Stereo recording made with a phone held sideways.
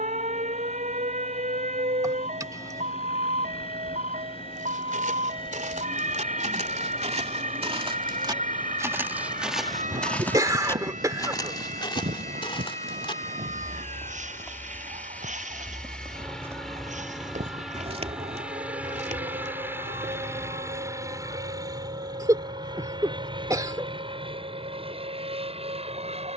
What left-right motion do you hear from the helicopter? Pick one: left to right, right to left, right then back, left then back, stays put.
left to right.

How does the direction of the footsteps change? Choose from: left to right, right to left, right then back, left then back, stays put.
left then back.